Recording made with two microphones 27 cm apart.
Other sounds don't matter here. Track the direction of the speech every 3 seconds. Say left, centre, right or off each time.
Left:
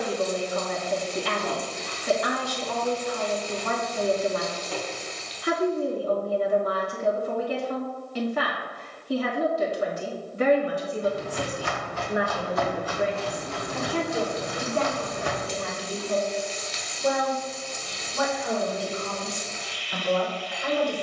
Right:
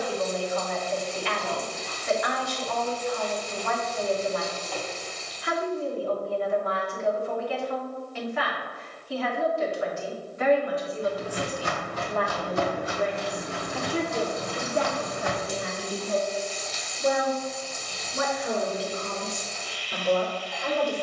left, left, left, left, centre, right, right.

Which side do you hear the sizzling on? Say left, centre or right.
left.